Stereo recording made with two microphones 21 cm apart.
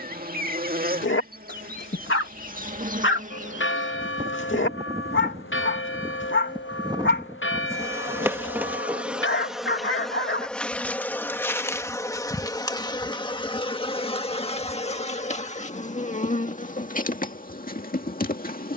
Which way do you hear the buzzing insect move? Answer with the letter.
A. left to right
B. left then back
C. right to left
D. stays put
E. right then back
C.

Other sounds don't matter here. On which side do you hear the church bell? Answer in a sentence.
In this clip you hear the church bell on the left.